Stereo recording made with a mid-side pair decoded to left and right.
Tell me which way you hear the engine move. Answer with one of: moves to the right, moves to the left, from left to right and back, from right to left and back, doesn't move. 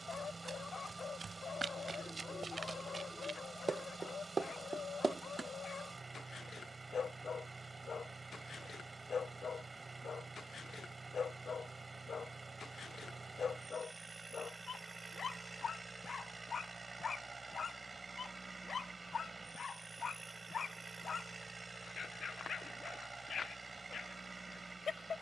doesn't move.